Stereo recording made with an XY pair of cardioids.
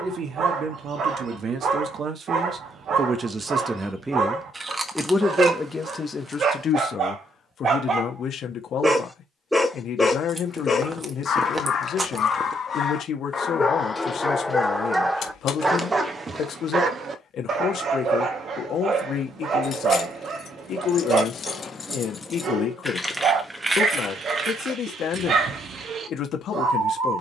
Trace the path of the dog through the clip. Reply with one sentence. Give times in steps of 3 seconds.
You can hear the dog on the right from 0 s, on the left from 9 s and on the right from 15 s.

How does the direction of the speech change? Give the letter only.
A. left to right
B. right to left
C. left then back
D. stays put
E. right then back
B.